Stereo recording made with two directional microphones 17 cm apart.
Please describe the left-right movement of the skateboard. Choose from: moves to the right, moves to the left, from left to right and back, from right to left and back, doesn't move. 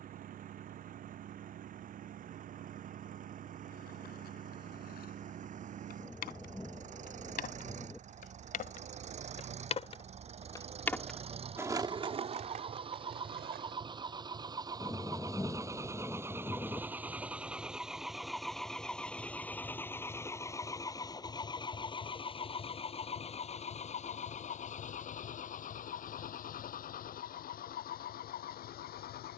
moves to the right.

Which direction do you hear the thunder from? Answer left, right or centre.
centre.